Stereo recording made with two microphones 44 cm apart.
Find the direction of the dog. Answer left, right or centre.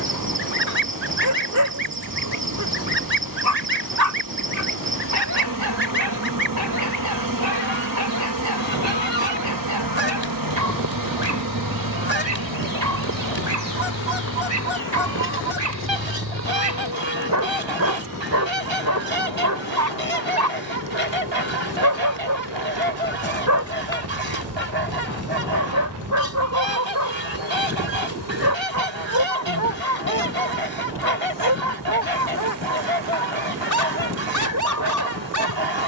right.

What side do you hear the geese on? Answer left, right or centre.
right.